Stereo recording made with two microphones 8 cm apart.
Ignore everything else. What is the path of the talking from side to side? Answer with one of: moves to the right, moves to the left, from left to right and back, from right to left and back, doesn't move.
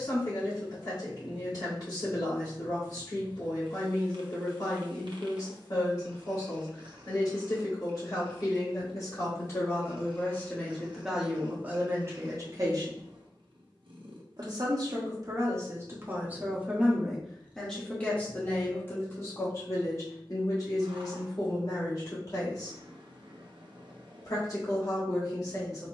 from left to right and back.